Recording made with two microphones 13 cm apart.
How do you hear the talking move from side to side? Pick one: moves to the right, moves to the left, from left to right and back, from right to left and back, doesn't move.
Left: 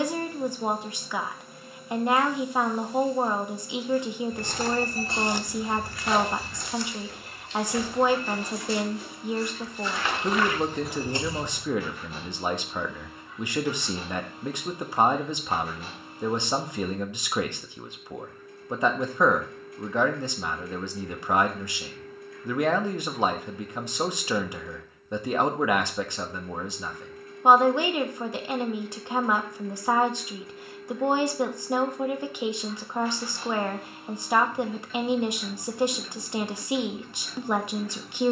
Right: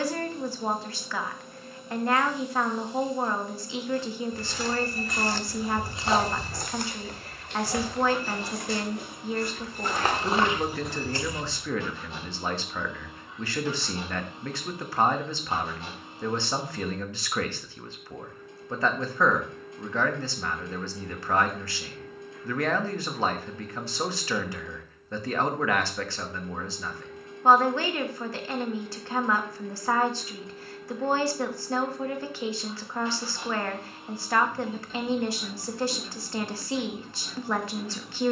doesn't move.